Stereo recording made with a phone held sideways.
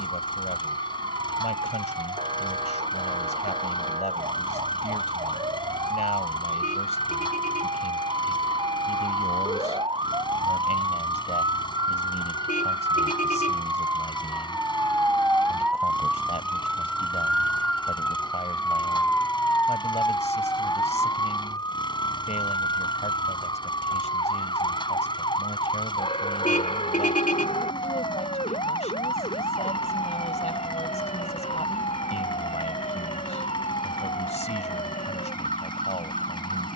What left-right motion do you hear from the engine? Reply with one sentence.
You can hear the engine stay put.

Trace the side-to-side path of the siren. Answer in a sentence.
You can hear the siren go from the right side to the left.